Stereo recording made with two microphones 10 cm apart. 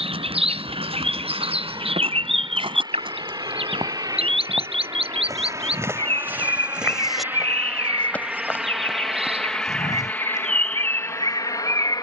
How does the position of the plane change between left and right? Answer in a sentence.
You can hear the plane go from the right side to the left.